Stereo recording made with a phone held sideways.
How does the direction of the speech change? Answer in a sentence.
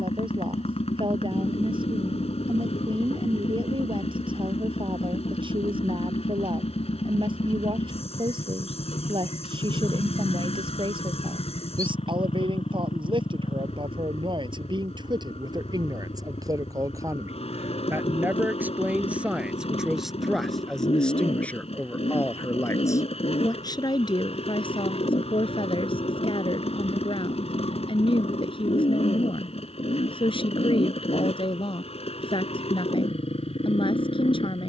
You can hear the speech travel towards the left.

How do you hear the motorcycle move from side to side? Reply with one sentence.
In this clip you hear the motorcycle stay put.